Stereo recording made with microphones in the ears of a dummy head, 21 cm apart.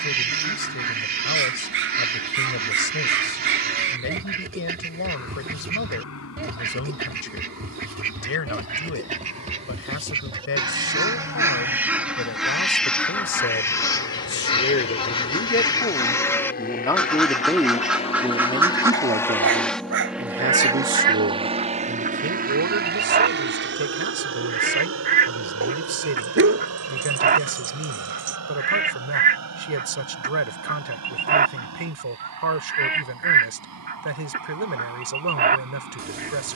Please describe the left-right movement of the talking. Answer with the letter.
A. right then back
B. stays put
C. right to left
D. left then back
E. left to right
E.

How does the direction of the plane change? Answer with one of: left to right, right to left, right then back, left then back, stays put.
left to right.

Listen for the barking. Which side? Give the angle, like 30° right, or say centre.
50° right.